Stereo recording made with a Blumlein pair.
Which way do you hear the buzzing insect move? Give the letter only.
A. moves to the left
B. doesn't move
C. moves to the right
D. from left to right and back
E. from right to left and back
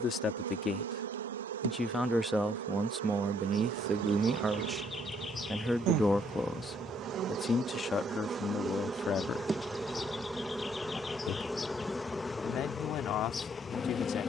A.